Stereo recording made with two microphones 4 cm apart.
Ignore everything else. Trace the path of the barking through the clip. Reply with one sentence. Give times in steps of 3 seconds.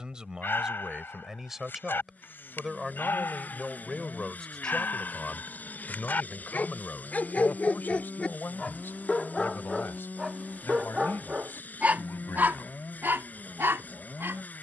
You can hear the barking on the left from 0 s, in the centre from 9 s and on the right from 12 s.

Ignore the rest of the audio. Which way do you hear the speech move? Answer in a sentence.
In this clip you hear the speech go from the right side to the left.